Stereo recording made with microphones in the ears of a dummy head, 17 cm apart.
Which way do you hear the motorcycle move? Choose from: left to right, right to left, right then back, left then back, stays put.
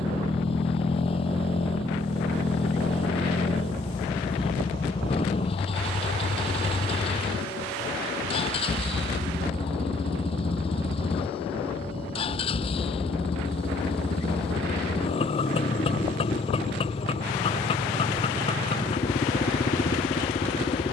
stays put.